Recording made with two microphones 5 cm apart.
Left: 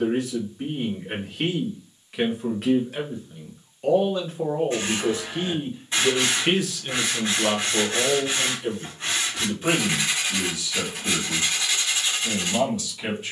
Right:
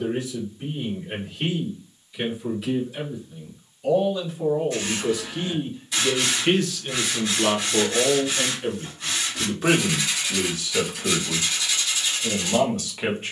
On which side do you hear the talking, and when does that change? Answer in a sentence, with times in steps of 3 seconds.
In this clip you hear the talking on the left from 0 s, in the centre from 6 s and on the right from 9 s.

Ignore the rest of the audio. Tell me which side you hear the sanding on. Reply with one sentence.
You can hear the sanding on the left.